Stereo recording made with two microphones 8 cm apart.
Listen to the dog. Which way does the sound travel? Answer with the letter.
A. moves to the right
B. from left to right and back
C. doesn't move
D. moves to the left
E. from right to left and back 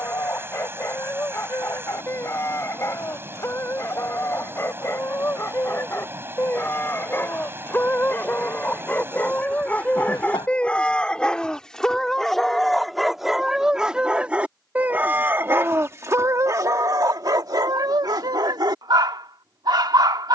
A.